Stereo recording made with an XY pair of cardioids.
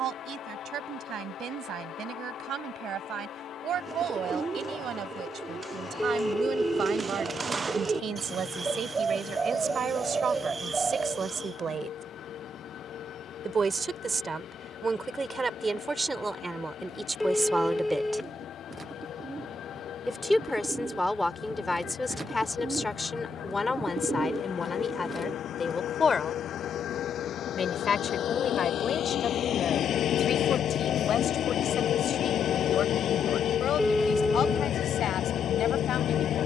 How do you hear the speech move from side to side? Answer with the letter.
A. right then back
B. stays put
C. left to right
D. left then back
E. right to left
E.